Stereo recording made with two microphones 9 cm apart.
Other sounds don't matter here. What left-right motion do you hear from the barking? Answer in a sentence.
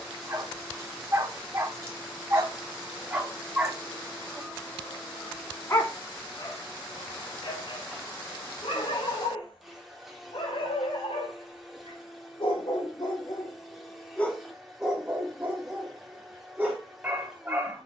You can hear the barking move from right to left and back again.